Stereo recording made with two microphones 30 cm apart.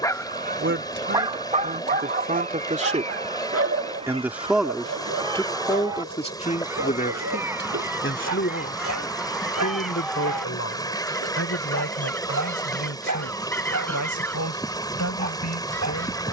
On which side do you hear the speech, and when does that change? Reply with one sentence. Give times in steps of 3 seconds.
You can hear the speech on the right from 0 s, in the centre from 3 s and on the left from 6 s.